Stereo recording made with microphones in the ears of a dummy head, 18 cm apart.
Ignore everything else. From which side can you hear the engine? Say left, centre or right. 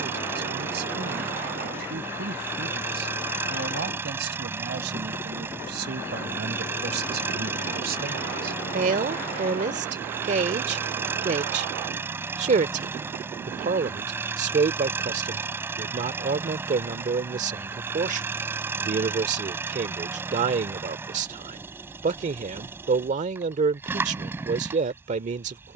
centre.